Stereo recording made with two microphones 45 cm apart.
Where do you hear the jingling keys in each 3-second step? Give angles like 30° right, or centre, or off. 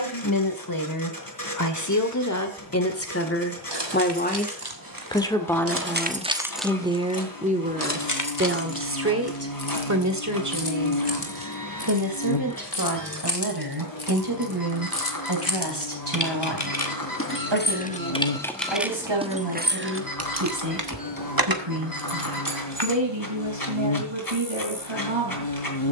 off, 50° right, 20° left, 60° left, 60° left, 40° left, 20° right, 60° right, off.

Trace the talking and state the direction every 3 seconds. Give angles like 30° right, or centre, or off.
40° left, 20° left, 20° right, 40° right, 50° right, 60° right, 70° right, 70° right, 70° right.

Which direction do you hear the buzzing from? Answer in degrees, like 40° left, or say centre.
70° left.